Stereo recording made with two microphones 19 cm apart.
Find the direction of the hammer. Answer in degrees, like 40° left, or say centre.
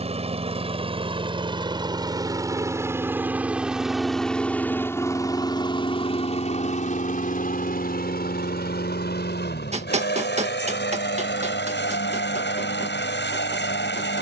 40° right.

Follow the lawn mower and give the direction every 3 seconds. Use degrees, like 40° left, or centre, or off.
30° right, 10° left, 50° left, 80° left, 80° left.